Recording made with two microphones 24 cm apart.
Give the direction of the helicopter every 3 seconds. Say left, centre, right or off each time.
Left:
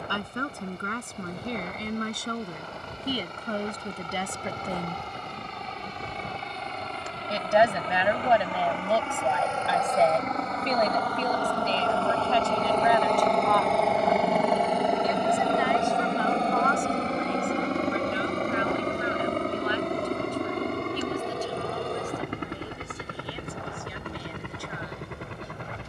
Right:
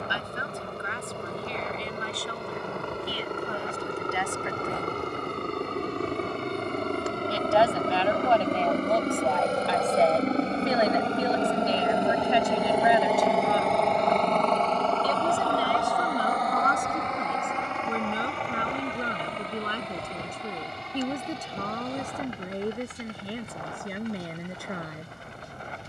right, right, right, right, centre, left, left, left, left.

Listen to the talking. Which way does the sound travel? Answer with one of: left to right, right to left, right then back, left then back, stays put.
left to right.